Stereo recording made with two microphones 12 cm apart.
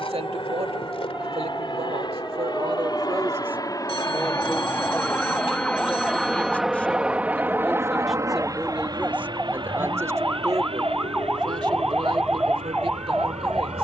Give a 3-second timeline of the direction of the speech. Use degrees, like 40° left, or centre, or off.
60° right, 10° right, centre, 30° right, 60° right.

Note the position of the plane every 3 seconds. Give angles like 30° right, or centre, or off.
50° left, 30° left, 20° right, 50° right, 60° right.